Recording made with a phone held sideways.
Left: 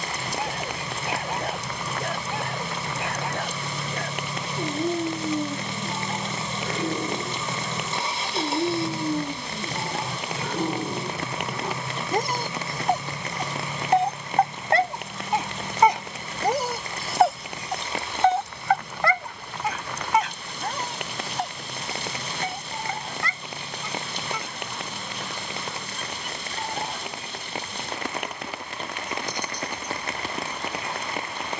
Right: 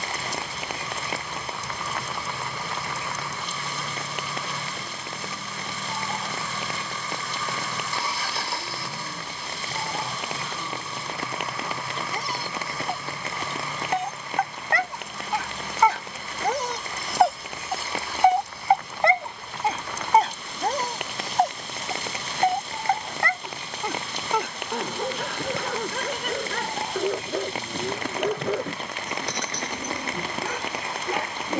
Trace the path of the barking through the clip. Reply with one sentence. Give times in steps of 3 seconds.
In this clip you hear the barking on the left from 0 s, in the centre from 15 s and on the right from 18 s.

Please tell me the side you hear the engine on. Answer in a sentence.
You can hear the engine on the left.